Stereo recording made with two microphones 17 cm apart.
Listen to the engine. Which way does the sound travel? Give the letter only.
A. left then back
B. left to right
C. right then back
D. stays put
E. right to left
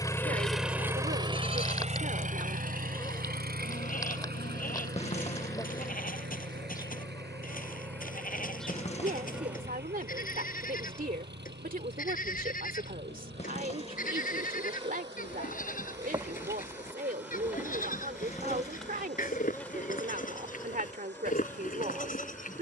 B.